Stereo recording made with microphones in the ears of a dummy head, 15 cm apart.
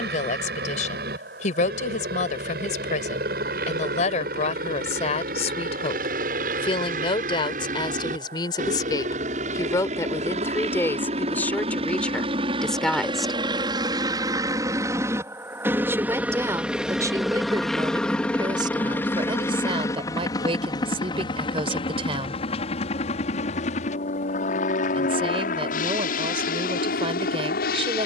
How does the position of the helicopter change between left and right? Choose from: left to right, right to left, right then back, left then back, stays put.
right to left.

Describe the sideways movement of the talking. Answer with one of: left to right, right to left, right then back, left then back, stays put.
left to right.